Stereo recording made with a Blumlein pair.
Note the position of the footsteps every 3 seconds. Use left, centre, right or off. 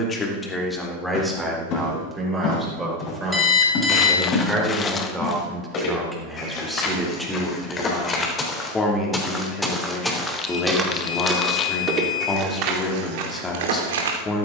left, left, left, centre, right.